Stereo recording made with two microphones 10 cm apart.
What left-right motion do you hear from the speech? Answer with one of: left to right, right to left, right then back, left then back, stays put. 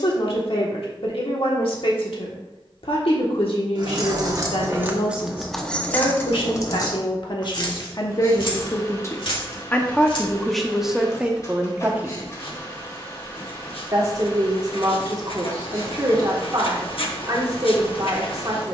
left to right.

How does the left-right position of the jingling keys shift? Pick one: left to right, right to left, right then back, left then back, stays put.
right to left.